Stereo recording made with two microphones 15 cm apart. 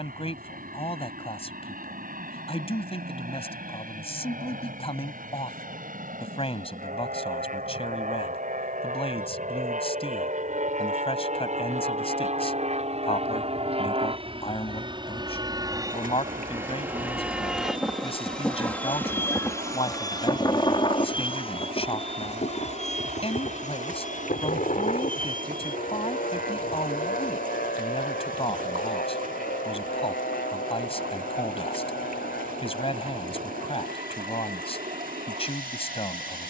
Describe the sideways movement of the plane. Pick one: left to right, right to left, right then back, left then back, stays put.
right to left.